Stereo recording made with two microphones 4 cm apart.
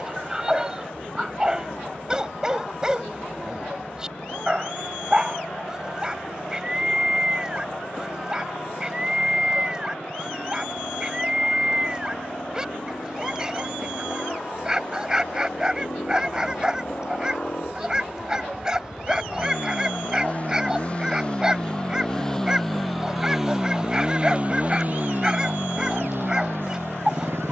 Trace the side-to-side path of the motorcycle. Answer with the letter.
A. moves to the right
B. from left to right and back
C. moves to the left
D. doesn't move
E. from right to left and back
A.